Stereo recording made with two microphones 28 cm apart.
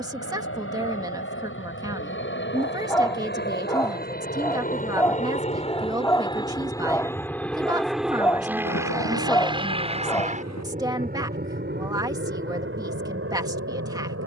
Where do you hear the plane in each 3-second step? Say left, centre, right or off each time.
left, left, centre, right, right.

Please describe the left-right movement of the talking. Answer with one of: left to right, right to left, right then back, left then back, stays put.
stays put.